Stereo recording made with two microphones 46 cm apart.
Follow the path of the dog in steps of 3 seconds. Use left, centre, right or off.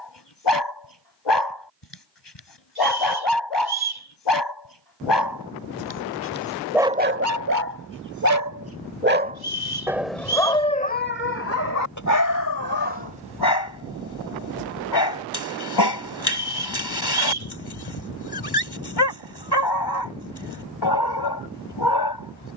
left, left, right, centre, left, left, left, left.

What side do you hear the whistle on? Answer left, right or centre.
right.